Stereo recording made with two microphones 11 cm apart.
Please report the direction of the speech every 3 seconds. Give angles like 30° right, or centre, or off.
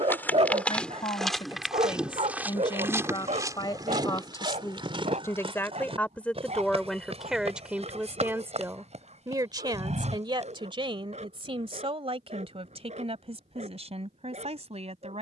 50° left, 30° left, 10° right, 50° right, 60° right.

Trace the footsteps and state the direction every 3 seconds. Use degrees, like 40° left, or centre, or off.
centre, 40° right, 70° right, 80° right, off.